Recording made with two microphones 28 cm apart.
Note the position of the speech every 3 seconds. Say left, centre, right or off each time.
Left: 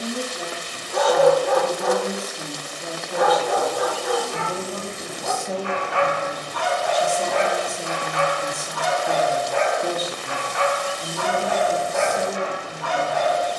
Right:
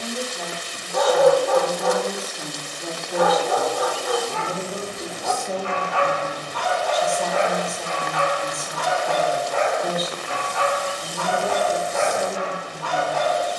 left, centre, left, left, left.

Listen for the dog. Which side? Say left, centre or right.
left.